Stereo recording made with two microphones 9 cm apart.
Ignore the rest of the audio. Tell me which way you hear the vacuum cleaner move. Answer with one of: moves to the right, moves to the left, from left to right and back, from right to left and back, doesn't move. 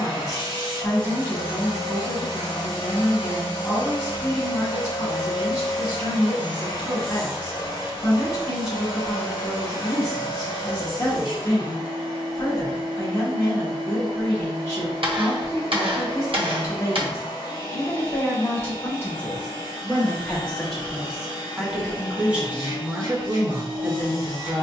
doesn't move.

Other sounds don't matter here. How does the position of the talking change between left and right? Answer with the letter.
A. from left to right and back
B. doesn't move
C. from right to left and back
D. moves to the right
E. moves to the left
D.